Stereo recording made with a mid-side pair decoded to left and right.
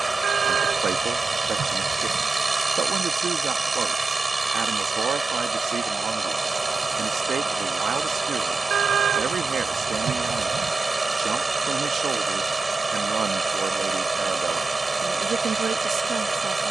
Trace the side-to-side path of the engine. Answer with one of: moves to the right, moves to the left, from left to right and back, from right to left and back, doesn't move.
doesn't move.